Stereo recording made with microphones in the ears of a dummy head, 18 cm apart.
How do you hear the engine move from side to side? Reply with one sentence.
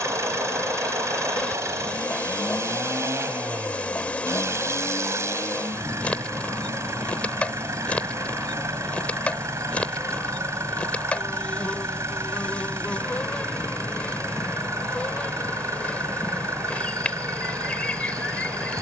In this clip you hear the engine stay in one place.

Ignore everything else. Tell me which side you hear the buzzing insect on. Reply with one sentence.
In this clip you hear the buzzing insect in the centre.